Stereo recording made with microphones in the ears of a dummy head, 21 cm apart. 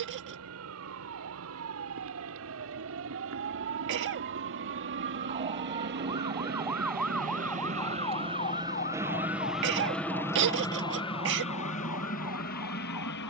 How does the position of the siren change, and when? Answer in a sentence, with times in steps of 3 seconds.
You can hear the siren on the right from 0 s, in the centre from 6 s and on the left from 9 s.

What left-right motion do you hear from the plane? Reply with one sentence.
In this clip you hear the plane go from the right side to the left.